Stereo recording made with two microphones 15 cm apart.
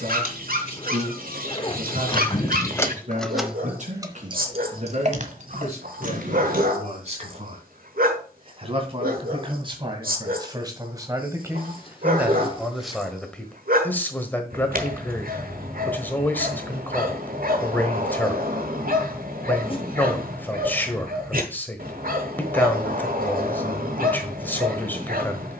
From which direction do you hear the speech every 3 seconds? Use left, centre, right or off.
right, right, right, right, centre, centre, centre, centre, centre.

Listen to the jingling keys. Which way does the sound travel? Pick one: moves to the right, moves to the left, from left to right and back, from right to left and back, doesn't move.
moves to the right.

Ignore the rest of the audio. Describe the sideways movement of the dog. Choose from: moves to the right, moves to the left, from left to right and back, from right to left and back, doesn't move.
doesn't move.